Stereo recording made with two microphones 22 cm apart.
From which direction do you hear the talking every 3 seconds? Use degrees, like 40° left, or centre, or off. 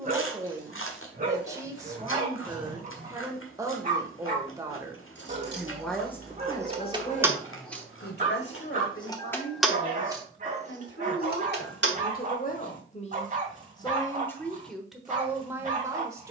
20° right, 10° right, 40° left, 60° left, 20° left, 10° right.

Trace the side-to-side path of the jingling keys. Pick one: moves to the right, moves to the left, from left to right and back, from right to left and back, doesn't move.
from right to left and back.